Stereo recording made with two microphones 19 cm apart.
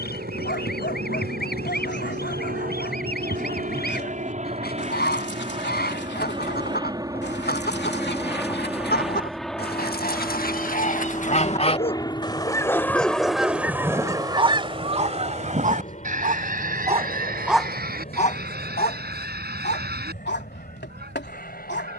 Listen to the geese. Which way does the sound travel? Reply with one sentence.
You can hear the geese move to the right.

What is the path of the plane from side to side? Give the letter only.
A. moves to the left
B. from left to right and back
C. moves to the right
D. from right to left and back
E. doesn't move
A.